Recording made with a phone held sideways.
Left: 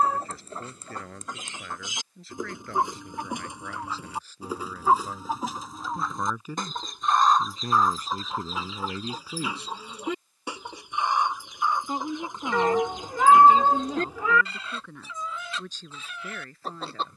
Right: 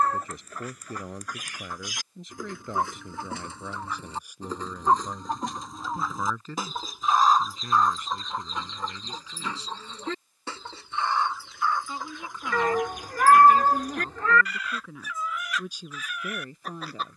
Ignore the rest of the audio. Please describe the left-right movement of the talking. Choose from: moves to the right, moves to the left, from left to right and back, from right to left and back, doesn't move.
from right to left and back.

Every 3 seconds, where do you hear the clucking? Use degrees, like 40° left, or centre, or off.
20° left, 10° left, centre, 10° left, 20° left, 30° left.